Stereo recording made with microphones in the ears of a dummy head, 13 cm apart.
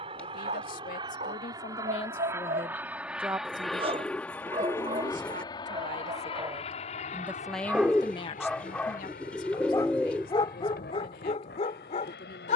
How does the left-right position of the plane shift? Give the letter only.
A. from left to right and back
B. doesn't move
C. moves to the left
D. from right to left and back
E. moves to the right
C.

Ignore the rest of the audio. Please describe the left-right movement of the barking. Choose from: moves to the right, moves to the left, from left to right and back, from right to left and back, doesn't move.
moves to the left.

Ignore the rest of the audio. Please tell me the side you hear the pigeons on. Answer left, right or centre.
centre.